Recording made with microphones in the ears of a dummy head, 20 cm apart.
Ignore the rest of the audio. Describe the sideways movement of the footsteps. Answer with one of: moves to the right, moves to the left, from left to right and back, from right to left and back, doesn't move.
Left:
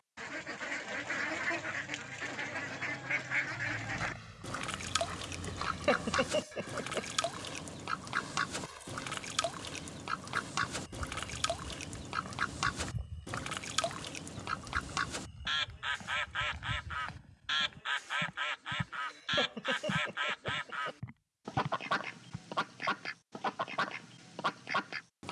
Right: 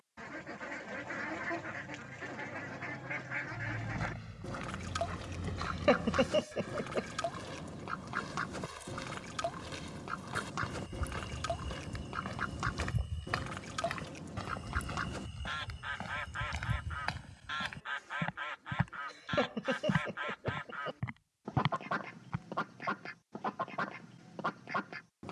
moves to the right.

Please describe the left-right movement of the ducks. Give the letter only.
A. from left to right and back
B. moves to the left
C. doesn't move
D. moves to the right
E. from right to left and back
C.